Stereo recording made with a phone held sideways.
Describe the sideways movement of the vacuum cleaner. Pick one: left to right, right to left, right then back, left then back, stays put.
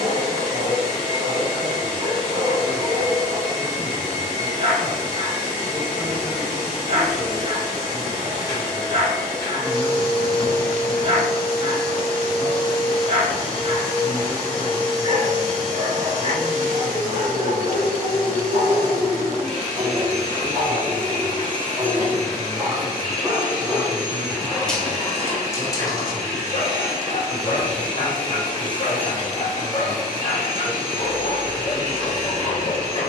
stays put.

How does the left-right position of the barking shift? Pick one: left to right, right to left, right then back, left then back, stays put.
right to left.